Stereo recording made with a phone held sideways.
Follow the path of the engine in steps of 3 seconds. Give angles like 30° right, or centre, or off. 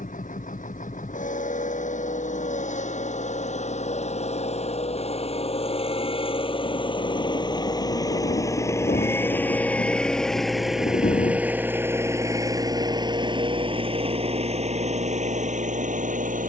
50° left, 40° left, 30° left, centre, 30° right, 50° right.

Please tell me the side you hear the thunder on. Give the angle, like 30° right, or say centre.
60° left.